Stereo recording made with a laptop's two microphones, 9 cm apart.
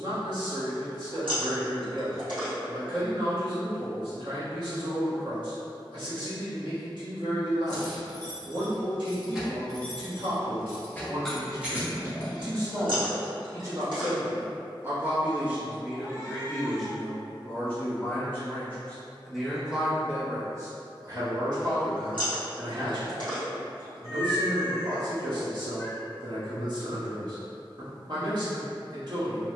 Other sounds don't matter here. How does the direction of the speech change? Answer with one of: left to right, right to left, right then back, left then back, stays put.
left then back.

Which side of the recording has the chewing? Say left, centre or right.
right.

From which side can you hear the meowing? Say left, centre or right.
right.